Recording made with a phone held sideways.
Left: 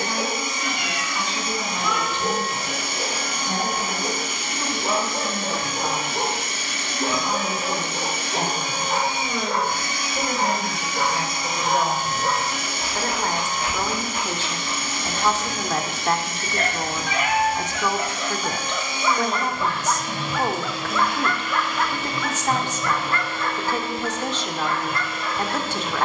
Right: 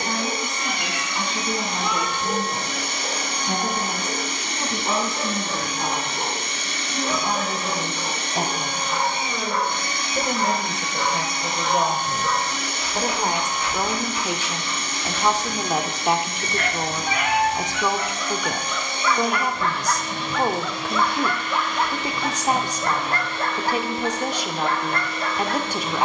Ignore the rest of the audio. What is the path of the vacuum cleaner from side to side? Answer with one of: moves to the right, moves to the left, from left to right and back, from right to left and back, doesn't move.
doesn't move.